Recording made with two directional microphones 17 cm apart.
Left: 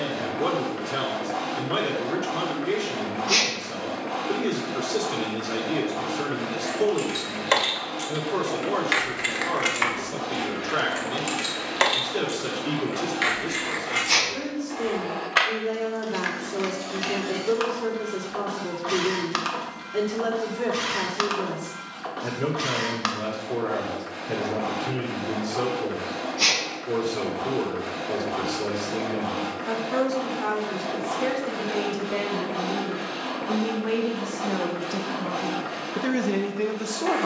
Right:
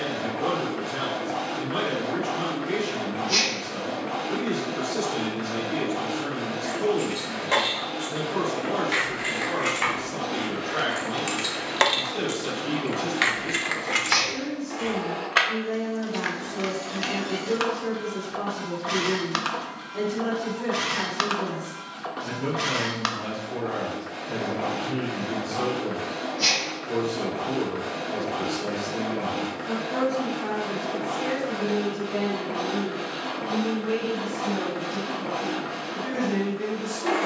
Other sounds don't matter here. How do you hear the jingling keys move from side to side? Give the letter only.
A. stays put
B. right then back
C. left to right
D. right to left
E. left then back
C.